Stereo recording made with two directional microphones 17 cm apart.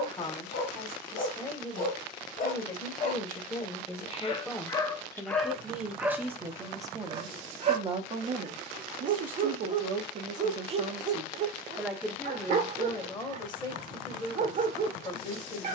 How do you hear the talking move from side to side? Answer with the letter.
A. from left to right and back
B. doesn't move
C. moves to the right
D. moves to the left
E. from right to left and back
A.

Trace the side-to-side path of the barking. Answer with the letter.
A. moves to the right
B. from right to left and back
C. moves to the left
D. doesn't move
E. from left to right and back
A.